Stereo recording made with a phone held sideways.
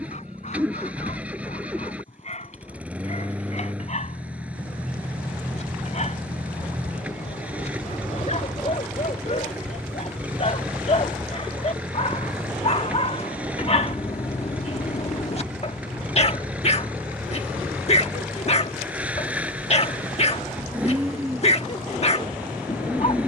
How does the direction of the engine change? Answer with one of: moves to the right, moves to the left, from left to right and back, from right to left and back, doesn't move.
doesn't move.